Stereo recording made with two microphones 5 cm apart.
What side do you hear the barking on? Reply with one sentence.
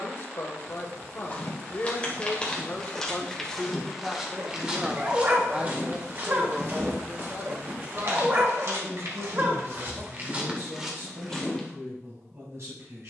You can hear the barking on the right.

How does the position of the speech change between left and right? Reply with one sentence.
You can hear the speech move to the right.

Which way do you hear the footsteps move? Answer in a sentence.
You can hear the footsteps go right and come back.